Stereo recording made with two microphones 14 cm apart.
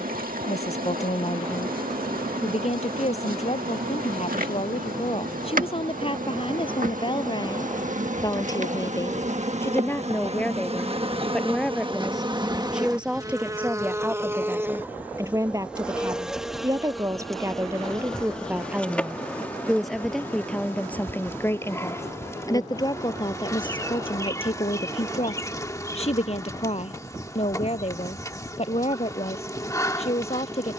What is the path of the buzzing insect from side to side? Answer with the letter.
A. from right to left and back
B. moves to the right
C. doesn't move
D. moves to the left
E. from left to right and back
D.